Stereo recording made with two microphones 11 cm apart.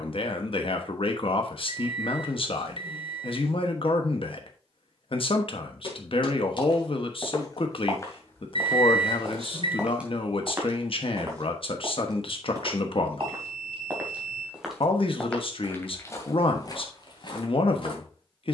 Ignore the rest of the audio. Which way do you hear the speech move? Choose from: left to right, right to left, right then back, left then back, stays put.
stays put.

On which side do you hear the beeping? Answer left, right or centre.
right.